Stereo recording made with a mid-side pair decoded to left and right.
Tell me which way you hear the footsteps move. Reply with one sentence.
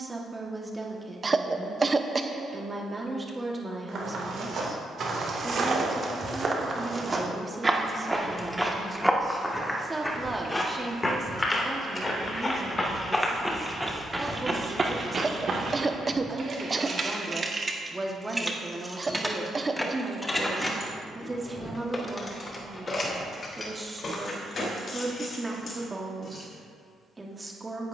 You can hear the footsteps move from right to left and back again.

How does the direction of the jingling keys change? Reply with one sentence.
In this clip you hear the jingling keys move from right to left.